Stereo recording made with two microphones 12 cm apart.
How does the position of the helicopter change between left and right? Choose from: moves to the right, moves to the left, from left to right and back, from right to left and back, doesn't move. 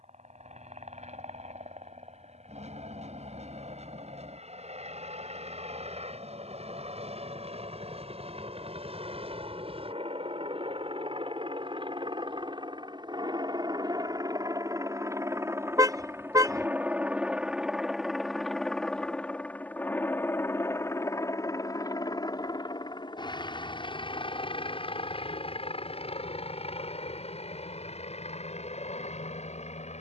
moves to the left.